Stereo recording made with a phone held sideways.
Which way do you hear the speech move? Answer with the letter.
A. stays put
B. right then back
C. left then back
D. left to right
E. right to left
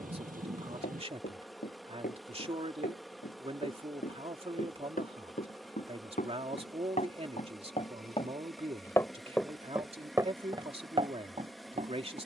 A.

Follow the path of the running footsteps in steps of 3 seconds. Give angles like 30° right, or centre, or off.
80° left, 70° left, 50° left, 30° right.